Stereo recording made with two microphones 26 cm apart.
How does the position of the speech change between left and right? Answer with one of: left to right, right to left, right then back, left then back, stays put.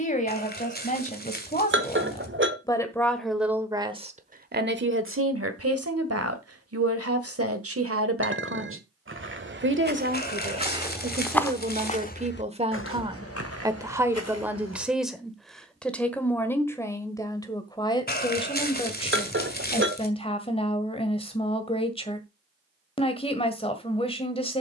right then back.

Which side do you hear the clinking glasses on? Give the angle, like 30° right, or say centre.
50° right.